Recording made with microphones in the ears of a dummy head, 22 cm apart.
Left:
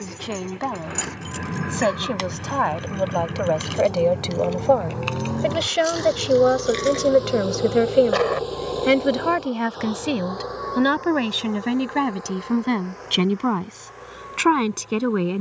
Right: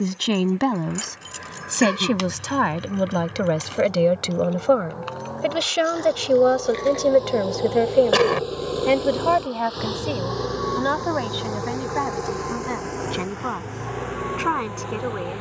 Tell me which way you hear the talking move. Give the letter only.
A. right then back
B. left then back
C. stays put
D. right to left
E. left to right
D.